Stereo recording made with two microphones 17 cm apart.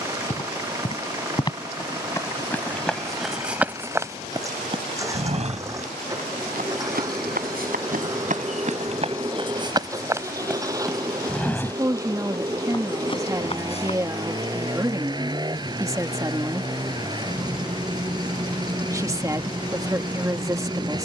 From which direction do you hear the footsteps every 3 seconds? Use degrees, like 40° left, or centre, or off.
20° left, 20° right, 50° right, 10° right, 30° left, off, off.